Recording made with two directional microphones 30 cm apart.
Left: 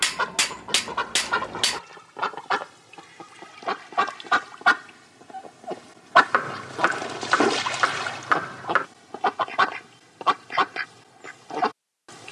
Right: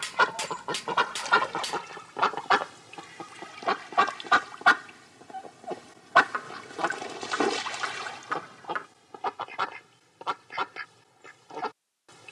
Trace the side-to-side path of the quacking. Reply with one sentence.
In this clip you hear the quacking move to the left.